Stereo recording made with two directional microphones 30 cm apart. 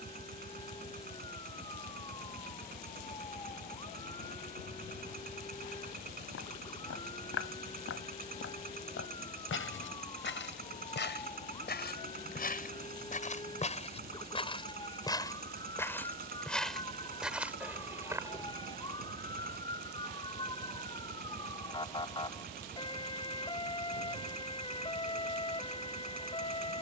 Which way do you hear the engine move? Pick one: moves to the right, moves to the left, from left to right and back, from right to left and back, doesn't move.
doesn't move.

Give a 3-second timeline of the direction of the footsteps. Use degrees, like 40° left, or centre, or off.
off, off, 50° left, 40° left, 20° left, centre, 10° right, off, off.